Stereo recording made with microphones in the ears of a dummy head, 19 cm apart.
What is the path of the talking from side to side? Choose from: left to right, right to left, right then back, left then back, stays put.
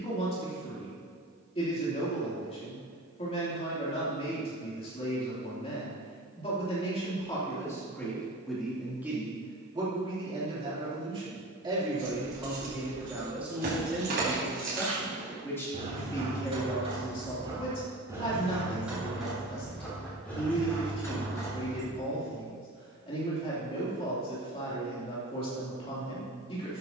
right then back.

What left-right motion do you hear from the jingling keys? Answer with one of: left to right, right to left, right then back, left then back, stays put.
right to left.